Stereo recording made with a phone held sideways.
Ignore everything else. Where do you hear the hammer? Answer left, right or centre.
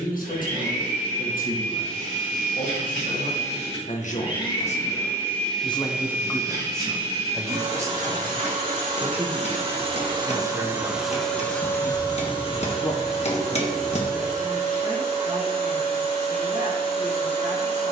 left.